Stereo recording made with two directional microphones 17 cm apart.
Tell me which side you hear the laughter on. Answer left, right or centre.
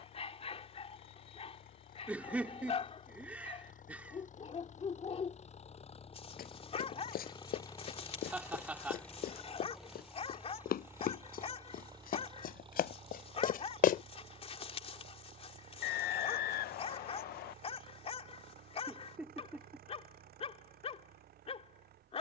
centre.